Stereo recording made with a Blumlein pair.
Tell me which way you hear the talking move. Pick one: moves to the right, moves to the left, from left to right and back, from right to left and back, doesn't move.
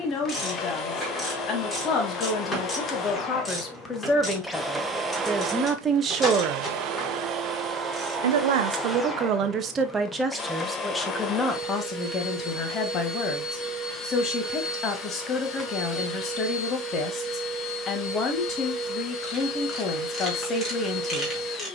from left to right and back.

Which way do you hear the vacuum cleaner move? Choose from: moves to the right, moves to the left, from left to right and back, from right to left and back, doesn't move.
from left to right and back.